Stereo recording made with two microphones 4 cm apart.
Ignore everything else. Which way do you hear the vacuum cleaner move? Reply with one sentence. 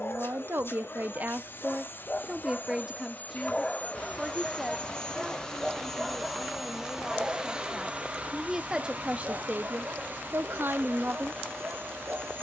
You can hear the vacuum cleaner move to the right.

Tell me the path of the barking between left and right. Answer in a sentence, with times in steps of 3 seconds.
You can hear the barking on the left from 0 s, in the centre from 3 s and on the right from 6 s.